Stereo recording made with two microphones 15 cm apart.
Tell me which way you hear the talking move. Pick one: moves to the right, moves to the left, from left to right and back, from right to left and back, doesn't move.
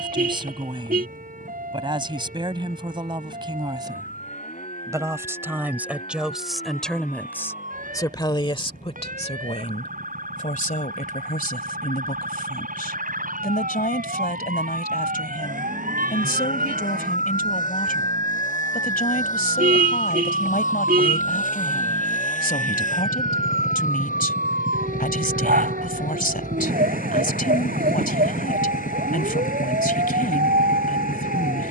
moves to the left.